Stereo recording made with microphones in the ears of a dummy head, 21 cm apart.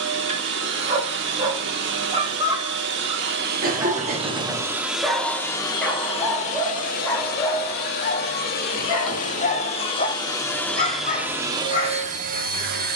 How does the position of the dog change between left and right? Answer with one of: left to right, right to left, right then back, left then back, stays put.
right to left.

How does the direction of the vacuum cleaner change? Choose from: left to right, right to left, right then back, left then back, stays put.
left then back.